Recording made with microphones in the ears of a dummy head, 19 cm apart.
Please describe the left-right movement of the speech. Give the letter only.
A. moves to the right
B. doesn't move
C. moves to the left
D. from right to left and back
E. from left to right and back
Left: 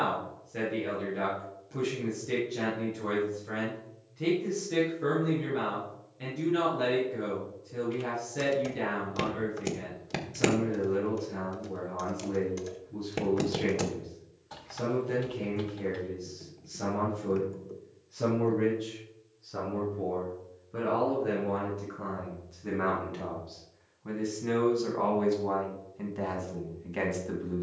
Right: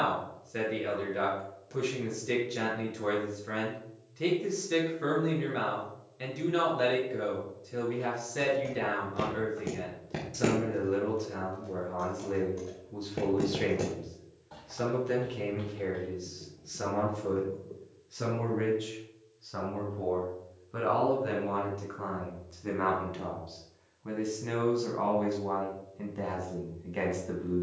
C.